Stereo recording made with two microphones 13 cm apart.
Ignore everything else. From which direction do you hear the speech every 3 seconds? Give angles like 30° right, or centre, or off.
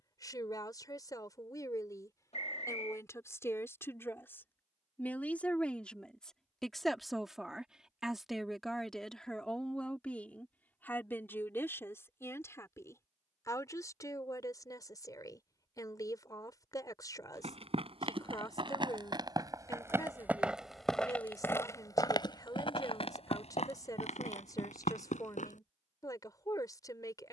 30° left, 10° left, centre, 10° left, 20° left, 30° left, 30° left, 30° left, 30° left.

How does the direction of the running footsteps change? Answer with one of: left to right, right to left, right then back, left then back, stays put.
right to left.